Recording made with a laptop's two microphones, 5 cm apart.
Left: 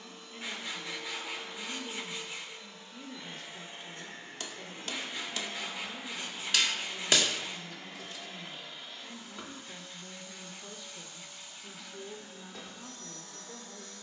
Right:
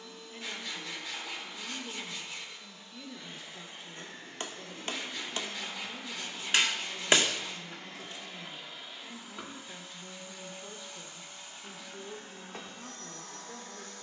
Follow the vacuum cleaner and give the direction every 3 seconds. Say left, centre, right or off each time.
left, left, centre, right, right.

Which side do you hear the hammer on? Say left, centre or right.
right.